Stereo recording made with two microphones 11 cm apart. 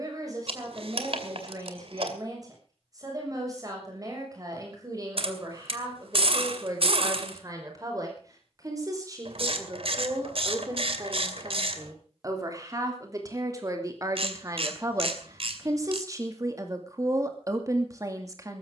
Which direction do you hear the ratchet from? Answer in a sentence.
In this clip you hear the ratchet on the right.